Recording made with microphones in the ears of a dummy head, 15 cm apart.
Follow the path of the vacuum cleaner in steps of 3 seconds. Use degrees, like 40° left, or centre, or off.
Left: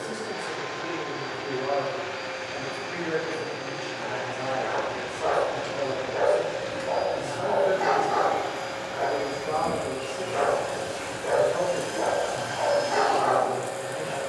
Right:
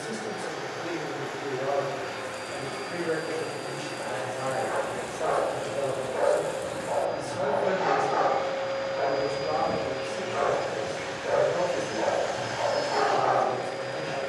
30° right, 20° right, 30° left, 10° right, 30° right.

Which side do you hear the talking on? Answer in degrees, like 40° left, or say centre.
50° right.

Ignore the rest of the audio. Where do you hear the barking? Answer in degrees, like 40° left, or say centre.
40° left.